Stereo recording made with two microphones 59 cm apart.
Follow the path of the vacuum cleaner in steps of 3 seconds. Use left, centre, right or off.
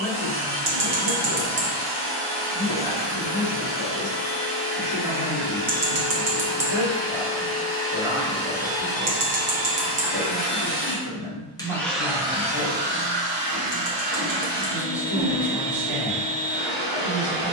left, left, left, left, right, right.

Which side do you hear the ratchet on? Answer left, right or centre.
right.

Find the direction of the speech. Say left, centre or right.
left.